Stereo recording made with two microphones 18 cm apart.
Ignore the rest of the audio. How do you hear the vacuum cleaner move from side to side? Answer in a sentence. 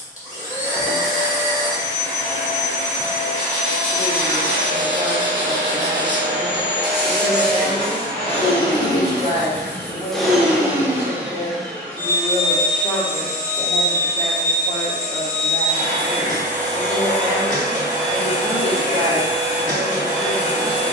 You can hear the vacuum cleaner go right and come back.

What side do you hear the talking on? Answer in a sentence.
In this clip you hear the talking on the left.